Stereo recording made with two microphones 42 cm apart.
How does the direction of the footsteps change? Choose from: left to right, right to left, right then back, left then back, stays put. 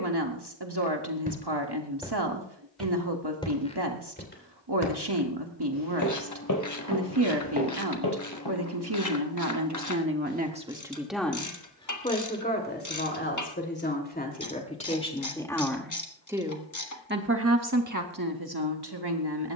right to left.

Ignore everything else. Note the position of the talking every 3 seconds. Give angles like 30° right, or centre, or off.
60° right, 60° right, 60° right, 20° right, 20° left, 10° right, 60° right.